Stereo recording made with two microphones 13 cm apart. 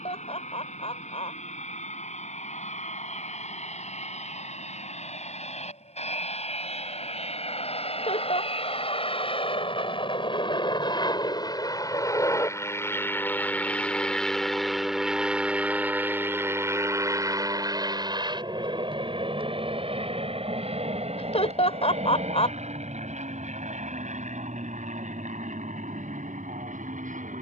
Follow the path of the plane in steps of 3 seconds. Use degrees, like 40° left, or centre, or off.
70° left, 60° left, 50° left, 40° left, 10° left, 20° right, 40° right, 50° right, 60° right.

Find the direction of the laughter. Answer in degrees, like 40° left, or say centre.
50° left.